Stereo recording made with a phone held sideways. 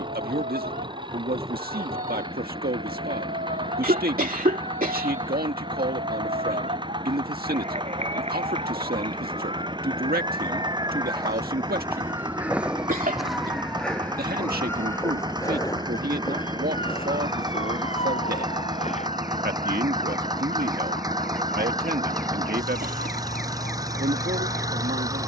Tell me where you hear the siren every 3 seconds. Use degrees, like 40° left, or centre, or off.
60° right, 60° right, 50° right, 30° right, centre, 30° left, 50° left, 60° left, 60° left.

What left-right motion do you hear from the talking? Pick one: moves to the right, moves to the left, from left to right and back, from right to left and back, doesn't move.
doesn't move.